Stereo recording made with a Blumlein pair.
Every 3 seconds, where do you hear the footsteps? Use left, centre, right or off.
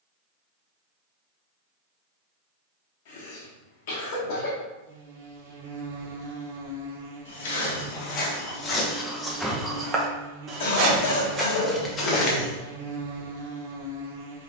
off, off, left, centre, left.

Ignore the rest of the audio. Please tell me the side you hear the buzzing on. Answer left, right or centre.
right.